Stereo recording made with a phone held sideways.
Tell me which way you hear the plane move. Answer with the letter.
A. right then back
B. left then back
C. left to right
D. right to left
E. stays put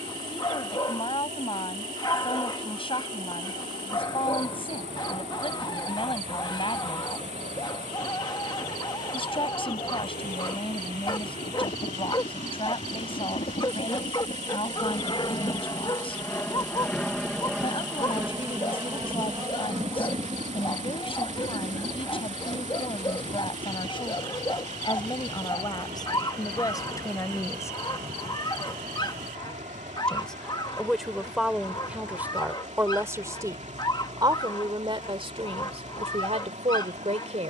C.